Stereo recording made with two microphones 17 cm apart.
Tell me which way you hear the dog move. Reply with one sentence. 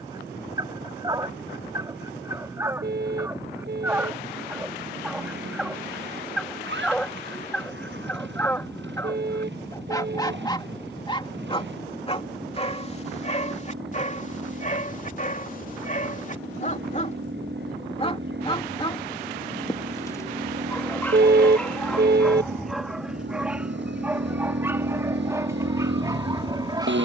You can hear the dog move from right to left and back again.